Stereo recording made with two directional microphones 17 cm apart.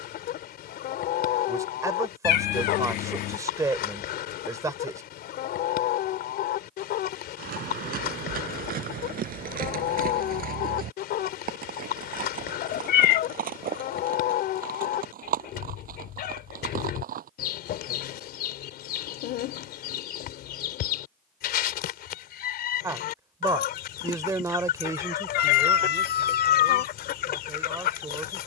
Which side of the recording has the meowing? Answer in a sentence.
You can hear the meowing on the left.